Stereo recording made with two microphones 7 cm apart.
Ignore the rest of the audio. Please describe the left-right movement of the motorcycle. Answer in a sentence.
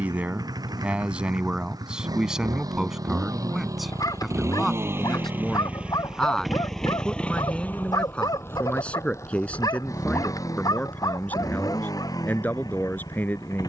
You can hear the motorcycle travel towards the left.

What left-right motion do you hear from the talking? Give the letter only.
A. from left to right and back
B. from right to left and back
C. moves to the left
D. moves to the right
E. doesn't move
C.